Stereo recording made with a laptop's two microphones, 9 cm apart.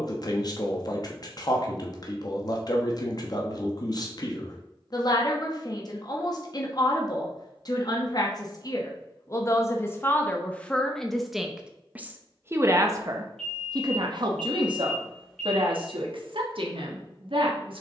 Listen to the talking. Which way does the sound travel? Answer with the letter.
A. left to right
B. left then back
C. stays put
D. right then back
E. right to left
A.